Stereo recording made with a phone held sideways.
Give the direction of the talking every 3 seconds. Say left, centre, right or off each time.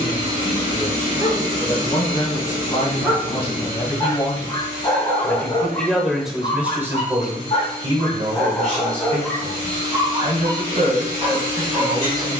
left, left, right, right.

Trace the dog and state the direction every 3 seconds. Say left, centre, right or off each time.
right, left, left, right.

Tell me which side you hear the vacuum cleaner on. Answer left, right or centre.
right.